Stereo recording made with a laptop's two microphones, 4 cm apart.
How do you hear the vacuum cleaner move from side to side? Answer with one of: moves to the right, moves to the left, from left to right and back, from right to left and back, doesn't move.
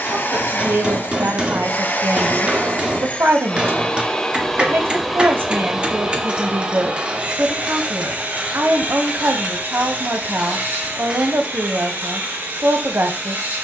moves to the right.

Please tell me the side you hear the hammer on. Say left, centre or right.
right.